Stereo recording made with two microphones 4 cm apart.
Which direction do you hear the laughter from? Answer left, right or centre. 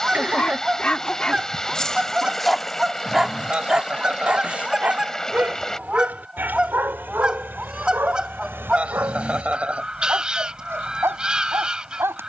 right.